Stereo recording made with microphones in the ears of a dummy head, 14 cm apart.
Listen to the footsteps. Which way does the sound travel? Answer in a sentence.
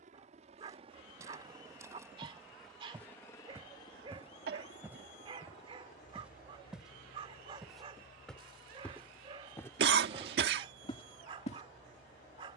In this clip you hear the footsteps move from right to left.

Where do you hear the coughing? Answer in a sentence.
In this clip you hear the coughing on the right.